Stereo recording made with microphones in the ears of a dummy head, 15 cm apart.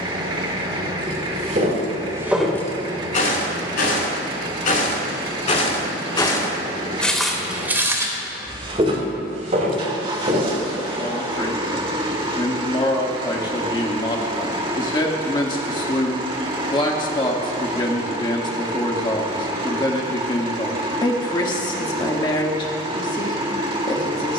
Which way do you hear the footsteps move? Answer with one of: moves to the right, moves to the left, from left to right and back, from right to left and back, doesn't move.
from right to left and back.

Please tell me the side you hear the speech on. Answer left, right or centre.
left.